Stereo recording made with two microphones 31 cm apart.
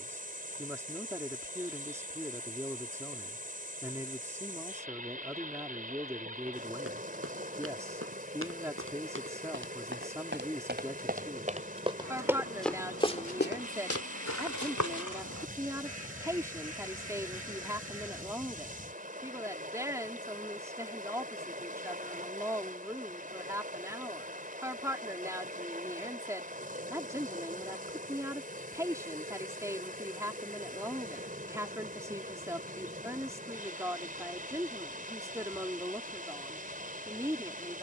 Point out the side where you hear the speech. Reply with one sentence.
You can hear the speech in the centre.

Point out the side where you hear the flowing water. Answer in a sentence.
In this clip you hear the flowing water on the right.